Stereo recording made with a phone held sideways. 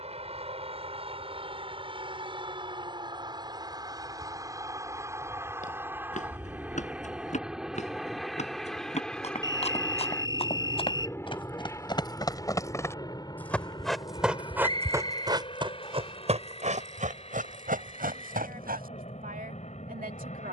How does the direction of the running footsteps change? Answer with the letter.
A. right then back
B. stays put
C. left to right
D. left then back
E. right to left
C.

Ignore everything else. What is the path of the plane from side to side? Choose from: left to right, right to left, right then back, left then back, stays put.
right to left.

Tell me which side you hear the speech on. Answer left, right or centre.
right.